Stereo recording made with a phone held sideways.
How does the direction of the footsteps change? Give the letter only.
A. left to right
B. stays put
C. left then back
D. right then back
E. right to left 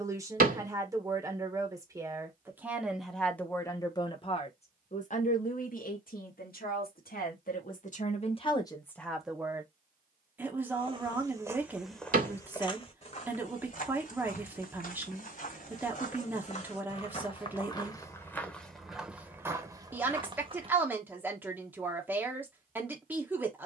C.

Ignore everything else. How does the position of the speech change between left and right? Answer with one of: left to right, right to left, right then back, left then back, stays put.
left then back.